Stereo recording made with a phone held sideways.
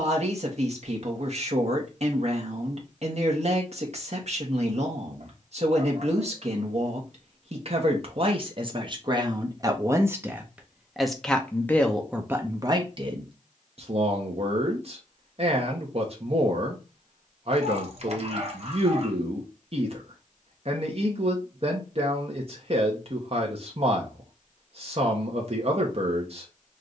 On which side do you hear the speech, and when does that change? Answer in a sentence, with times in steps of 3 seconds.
In this clip you hear the speech on the right from 0 s, in the centre from 9 s and on the right from 12 s.